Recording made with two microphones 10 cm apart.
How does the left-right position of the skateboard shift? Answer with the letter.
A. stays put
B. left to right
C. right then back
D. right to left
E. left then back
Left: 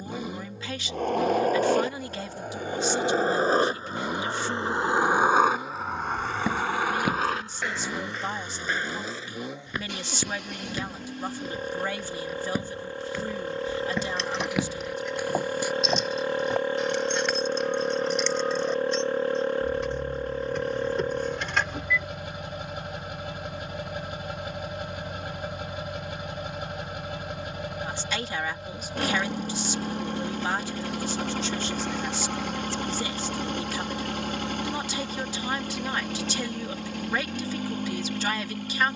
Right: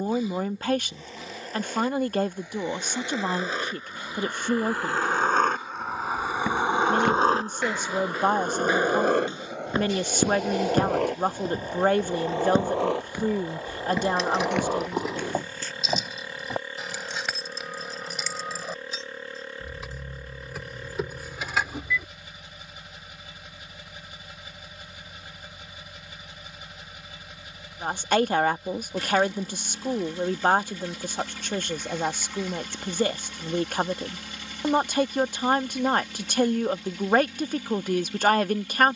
B.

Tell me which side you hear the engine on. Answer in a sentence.
You can hear the engine on the left.